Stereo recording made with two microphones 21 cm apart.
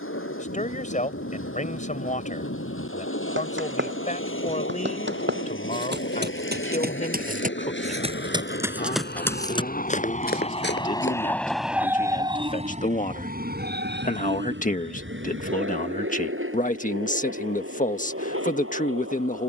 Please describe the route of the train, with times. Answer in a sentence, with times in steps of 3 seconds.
In this clip you hear the train on the left from 0 s and on the right from 12 s.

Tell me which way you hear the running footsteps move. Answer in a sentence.
You can hear the running footsteps move to the left.